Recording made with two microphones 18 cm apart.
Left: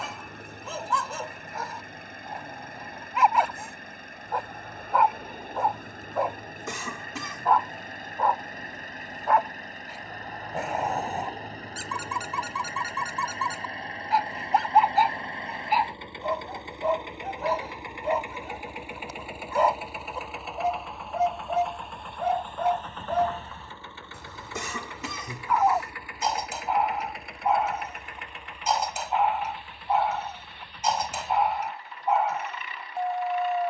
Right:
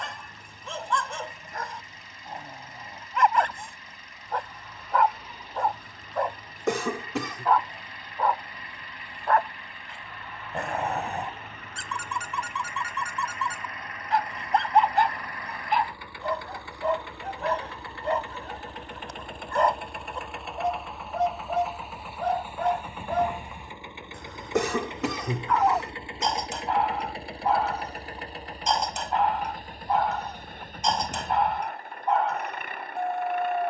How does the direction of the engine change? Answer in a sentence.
In this clip you hear the engine travel towards the right.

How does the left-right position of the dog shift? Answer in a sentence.
You can hear the dog stay in one place.